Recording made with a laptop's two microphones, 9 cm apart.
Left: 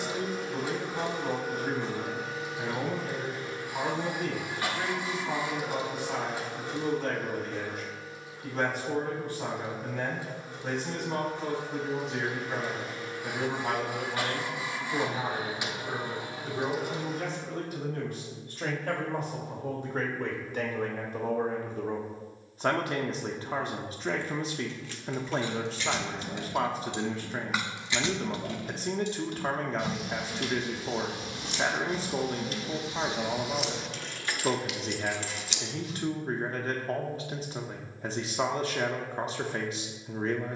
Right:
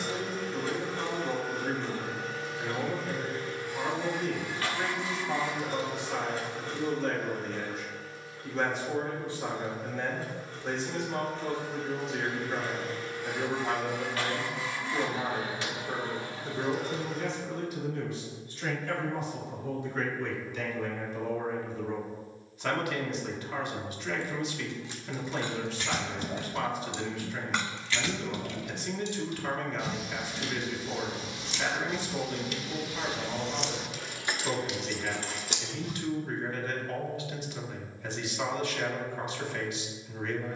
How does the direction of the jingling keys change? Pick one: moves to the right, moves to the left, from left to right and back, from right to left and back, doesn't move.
from right to left and back.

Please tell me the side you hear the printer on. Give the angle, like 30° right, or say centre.
20° left.